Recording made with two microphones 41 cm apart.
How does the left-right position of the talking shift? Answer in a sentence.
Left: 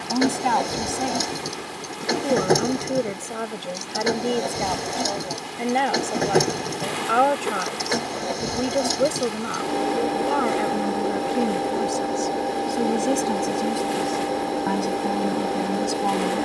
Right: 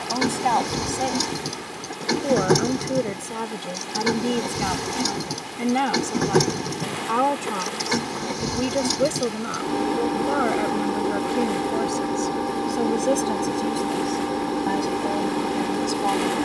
You can hear the talking go right and come back.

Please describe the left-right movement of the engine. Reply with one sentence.
You can hear the engine stay in one place.